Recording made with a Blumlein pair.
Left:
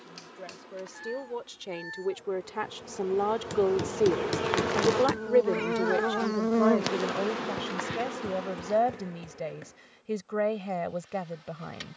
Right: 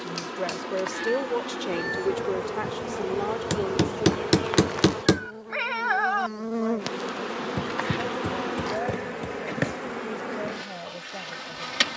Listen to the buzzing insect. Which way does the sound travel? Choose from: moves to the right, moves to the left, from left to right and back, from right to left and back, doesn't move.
from right to left and back.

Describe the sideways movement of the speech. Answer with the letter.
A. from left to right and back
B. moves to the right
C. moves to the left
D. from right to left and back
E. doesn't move
C.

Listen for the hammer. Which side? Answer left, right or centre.
right.